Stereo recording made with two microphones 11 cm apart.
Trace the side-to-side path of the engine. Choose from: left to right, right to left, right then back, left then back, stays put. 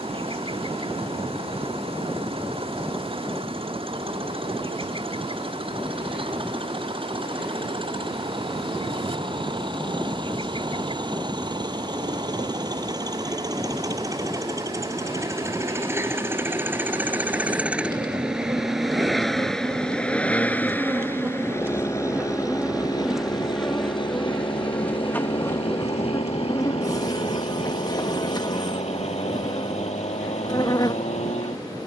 right to left.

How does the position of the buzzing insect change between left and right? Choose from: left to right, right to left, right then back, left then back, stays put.
right to left.